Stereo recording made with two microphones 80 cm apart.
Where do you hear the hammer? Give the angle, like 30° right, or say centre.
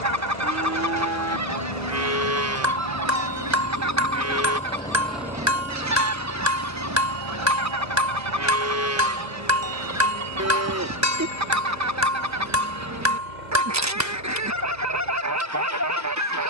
20° right.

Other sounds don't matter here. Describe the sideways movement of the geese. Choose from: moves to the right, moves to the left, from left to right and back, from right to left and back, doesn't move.
doesn't move.